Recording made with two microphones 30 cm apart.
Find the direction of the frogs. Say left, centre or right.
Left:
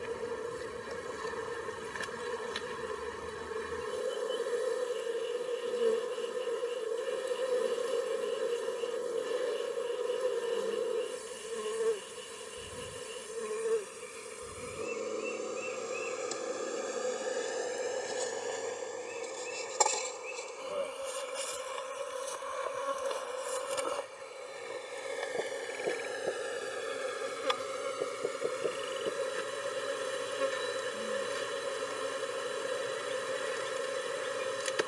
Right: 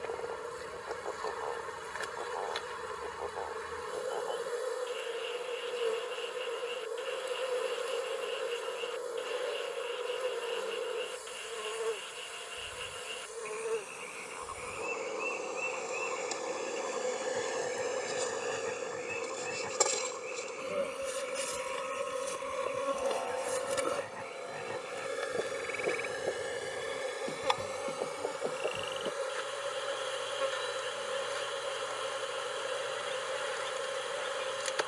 right.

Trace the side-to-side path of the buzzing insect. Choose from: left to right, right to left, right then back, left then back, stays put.
right then back.